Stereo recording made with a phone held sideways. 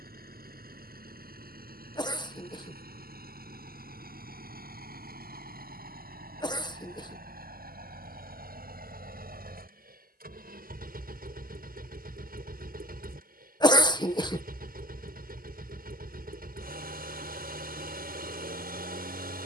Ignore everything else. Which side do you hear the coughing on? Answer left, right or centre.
left.